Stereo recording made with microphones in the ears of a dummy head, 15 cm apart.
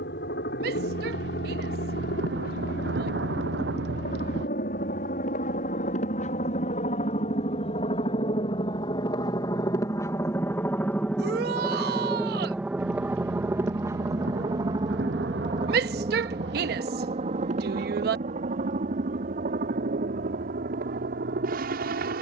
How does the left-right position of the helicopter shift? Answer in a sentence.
You can hear the helicopter travel towards the right.